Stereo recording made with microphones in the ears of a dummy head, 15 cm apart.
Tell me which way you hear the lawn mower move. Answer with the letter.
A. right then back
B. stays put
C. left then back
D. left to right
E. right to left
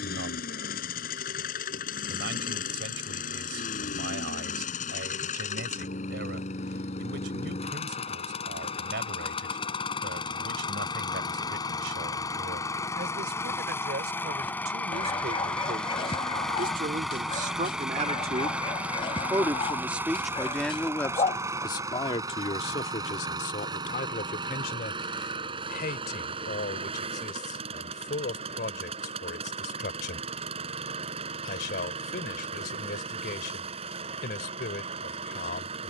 D.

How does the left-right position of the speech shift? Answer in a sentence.
In this clip you hear the speech move to the left.